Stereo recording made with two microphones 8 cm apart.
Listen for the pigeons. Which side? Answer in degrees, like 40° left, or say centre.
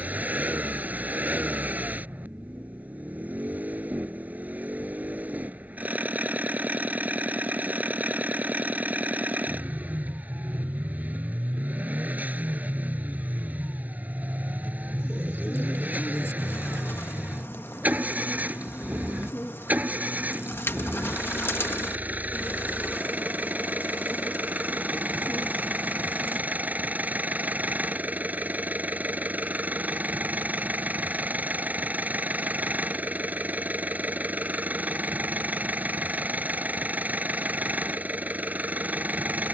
30° left.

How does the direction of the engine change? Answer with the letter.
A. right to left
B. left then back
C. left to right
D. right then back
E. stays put
E.